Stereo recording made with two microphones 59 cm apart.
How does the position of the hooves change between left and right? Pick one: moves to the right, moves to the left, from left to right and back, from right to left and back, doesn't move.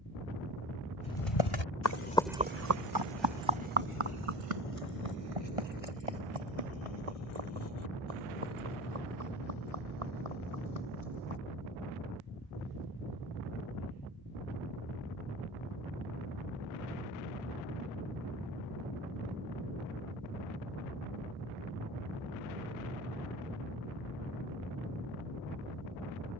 moves to the right.